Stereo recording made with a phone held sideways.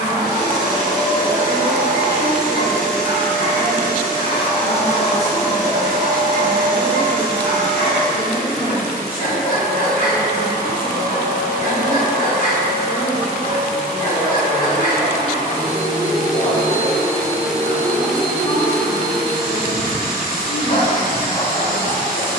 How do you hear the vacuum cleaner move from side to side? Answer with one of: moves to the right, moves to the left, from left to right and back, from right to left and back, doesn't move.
moves to the left.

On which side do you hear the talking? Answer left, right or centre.
left.